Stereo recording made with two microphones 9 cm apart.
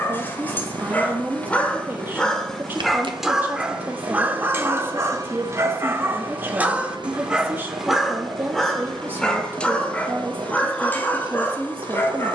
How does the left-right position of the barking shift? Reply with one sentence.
In this clip you hear the barking move from left to right and back again.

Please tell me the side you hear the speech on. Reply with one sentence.
You can hear the speech on the right.